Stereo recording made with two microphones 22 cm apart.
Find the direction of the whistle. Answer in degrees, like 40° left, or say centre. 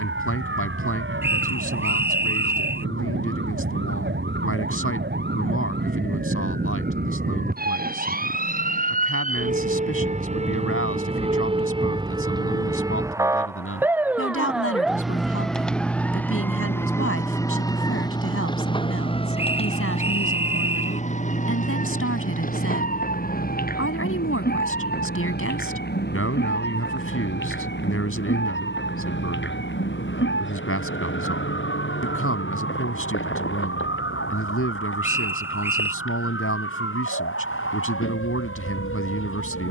10° right.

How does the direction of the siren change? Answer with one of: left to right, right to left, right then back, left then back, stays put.
right to left.